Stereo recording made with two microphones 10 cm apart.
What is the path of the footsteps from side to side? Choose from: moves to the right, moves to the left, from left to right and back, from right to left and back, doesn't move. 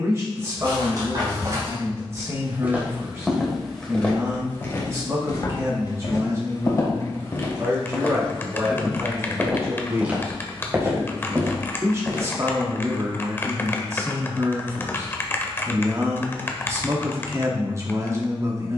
from right to left and back.